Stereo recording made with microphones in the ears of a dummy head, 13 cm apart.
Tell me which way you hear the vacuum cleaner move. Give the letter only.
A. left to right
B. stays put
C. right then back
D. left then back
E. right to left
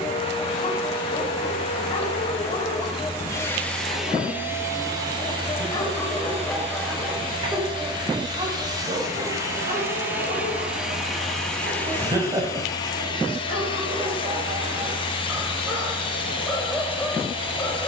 C.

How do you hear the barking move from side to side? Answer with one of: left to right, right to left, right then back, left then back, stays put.
right then back.